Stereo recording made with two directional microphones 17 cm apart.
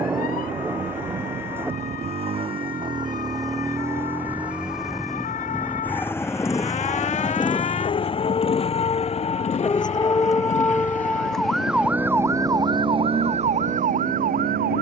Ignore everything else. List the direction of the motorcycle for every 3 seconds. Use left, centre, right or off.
right, centre, left, left, left.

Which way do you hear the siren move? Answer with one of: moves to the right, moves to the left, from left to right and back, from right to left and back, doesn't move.
moves to the right.